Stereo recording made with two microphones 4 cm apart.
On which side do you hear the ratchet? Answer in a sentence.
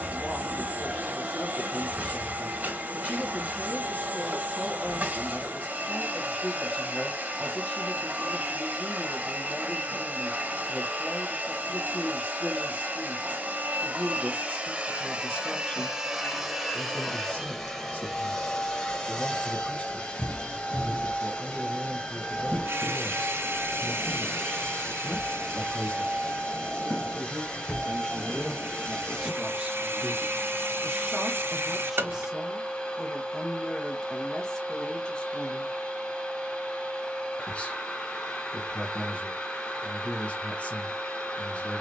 In this clip you hear the ratchet on the right.